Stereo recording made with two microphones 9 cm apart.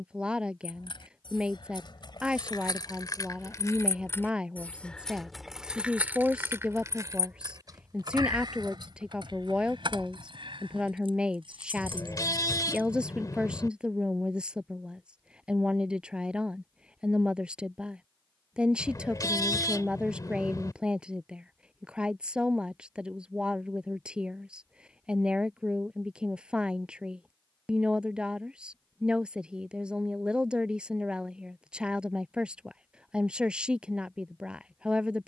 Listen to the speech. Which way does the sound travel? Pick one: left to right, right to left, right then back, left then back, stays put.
stays put.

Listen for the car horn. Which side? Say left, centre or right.
left.